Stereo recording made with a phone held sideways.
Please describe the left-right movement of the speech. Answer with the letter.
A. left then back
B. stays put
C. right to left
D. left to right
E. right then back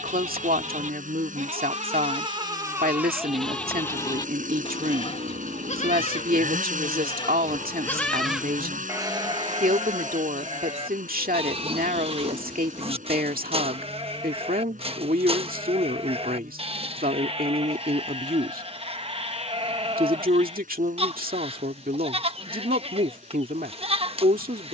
B.